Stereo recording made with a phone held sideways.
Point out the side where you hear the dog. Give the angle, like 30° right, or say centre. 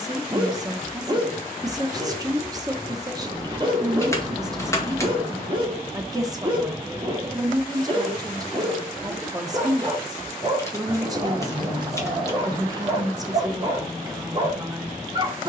30° right.